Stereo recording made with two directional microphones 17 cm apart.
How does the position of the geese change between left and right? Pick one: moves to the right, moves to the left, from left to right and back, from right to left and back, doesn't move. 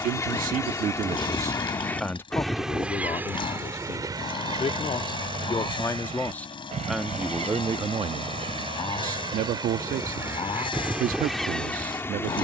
from left to right and back.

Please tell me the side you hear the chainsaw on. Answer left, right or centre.
left.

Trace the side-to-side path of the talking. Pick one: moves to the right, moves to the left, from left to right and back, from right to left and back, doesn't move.
from right to left and back.